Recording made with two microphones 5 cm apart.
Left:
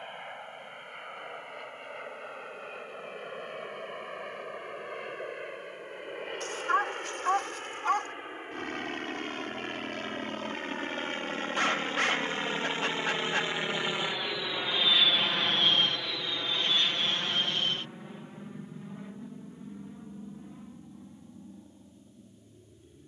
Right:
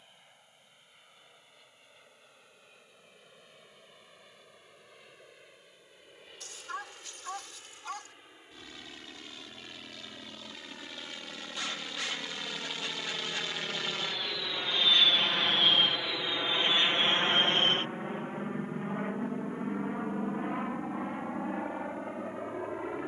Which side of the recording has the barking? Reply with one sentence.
In this clip you hear the barking on the left.